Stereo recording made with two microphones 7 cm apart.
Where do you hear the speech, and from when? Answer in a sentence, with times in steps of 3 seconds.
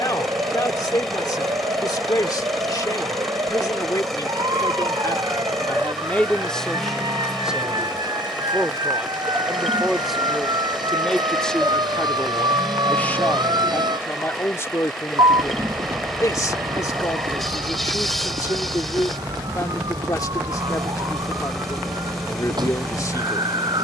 In this clip you hear the speech on the left from 0 s, in the centre from 6 s and on the left from 12 s.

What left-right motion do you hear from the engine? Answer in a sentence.
You can hear the engine stay in one place.